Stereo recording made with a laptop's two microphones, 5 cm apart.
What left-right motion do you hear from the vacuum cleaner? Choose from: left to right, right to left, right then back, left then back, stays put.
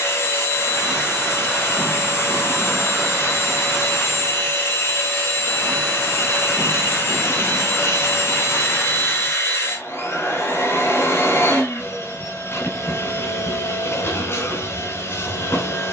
stays put.